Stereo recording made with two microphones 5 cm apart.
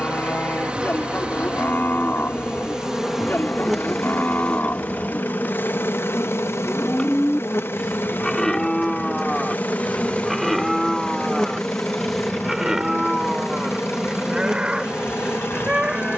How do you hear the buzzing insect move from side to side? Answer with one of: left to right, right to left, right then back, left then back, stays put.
left then back.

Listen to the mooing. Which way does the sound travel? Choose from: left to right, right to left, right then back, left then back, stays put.
left to right.